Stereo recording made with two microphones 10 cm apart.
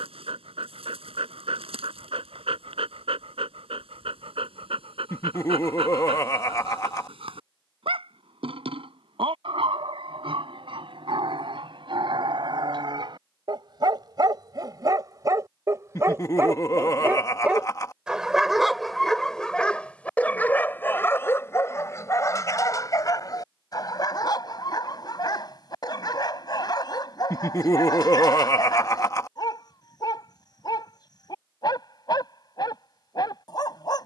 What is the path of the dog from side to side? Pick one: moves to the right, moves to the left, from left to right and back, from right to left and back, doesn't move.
moves to the left.